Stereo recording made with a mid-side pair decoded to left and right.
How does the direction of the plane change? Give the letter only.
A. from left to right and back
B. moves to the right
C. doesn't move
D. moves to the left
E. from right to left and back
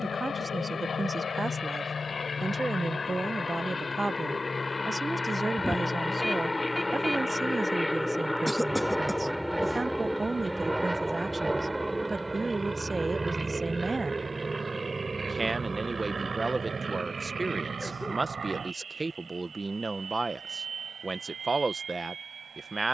B.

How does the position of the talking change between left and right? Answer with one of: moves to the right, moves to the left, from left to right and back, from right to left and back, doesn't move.
doesn't move.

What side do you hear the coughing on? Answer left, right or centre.
centre.